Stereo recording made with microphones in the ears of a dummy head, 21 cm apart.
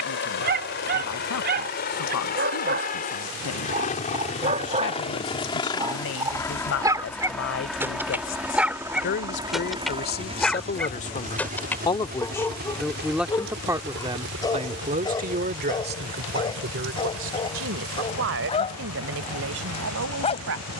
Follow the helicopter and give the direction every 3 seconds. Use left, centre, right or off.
left, left, centre, right, right, right, right.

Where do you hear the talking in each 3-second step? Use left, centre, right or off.
left, left, left, left, centre, right, right.